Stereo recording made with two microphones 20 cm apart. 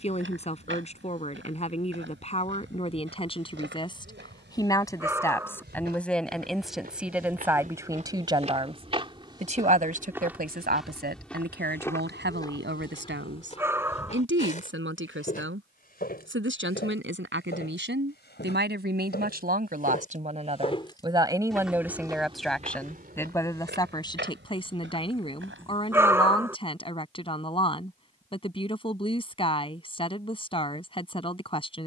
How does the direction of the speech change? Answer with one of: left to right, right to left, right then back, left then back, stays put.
right then back.